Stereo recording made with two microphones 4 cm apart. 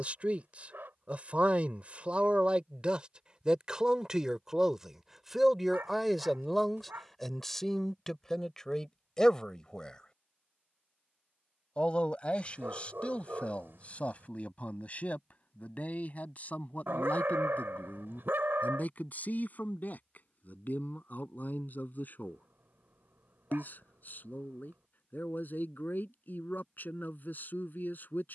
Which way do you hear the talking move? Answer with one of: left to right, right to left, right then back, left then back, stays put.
right to left.